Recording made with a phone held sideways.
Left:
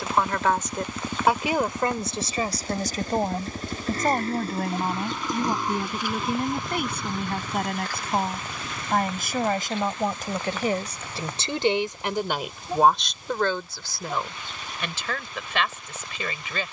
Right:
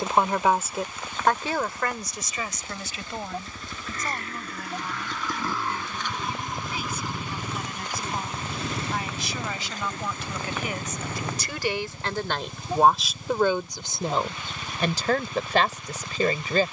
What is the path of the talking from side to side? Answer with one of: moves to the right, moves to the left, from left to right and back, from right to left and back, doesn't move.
from right to left and back.